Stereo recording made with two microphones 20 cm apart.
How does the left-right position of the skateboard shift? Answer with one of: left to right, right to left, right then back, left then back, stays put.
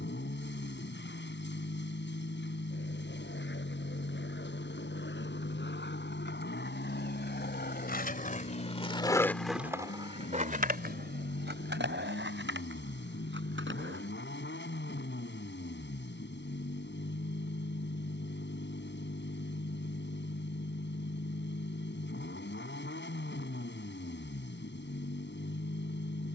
left to right.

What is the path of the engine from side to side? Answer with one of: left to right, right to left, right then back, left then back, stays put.
stays put.